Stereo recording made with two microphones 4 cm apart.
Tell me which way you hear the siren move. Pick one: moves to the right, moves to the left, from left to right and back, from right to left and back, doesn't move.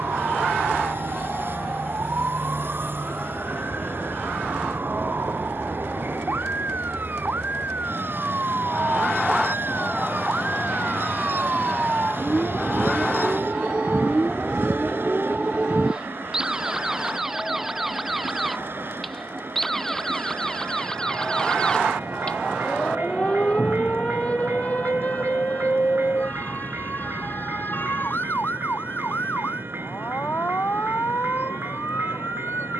moves to the left.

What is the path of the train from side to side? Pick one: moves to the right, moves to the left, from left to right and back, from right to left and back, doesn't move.
doesn't move.